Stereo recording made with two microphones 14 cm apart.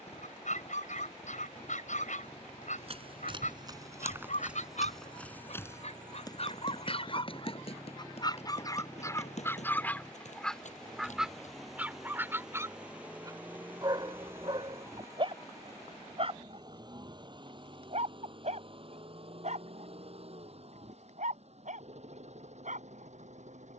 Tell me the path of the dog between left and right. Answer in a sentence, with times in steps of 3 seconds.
You can hear the dog on the left from 0 s, in the centre from 9 s and on the right from 12 s.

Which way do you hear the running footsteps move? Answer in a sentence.
You can hear the running footsteps go from the right side to the left.